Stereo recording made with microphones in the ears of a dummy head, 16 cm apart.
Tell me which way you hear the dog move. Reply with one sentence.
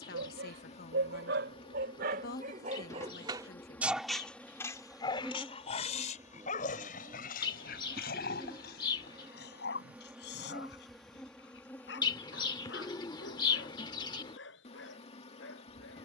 You can hear the dog go from the right side to the left.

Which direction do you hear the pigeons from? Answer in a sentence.
You can hear the pigeons on the left.